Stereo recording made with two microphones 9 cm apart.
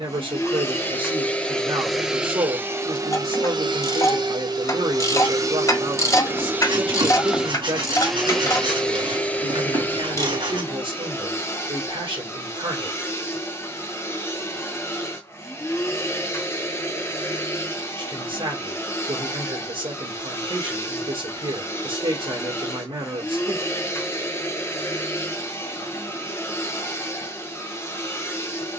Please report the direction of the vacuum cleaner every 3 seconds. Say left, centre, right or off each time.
centre, right, centre, left, left, left, left, left, left, left.